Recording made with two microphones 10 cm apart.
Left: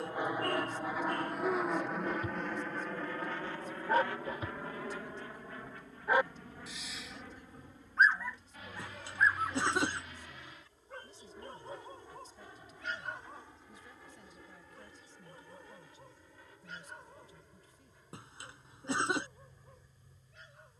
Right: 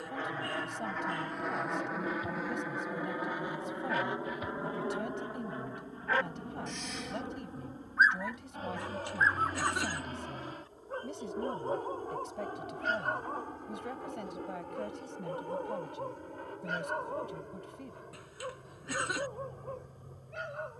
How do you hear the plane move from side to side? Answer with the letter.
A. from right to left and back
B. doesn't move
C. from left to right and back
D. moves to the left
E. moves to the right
E.